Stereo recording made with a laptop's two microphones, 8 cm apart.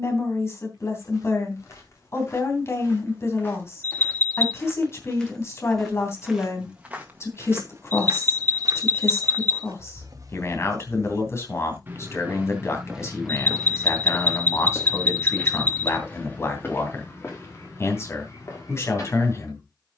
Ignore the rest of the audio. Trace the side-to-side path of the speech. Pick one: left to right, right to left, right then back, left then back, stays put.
stays put.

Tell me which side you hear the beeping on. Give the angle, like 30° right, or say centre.
20° left.